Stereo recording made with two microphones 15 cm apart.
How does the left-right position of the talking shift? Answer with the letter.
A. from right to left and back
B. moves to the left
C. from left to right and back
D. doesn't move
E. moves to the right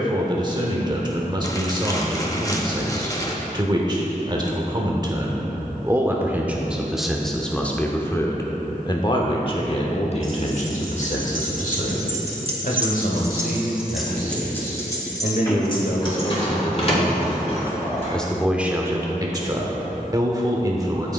A.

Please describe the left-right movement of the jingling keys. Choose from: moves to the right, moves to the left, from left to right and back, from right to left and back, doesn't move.
moves to the left.